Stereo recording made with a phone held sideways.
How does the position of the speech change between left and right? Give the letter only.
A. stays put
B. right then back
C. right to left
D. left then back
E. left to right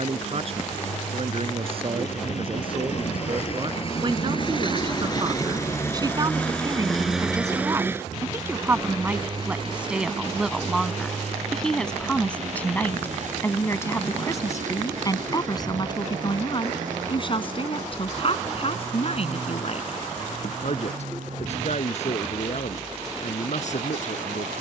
C.